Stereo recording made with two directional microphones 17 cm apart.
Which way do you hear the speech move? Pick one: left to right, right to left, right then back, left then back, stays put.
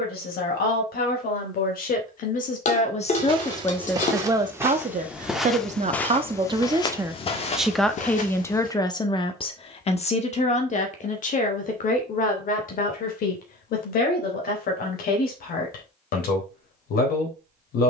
right then back.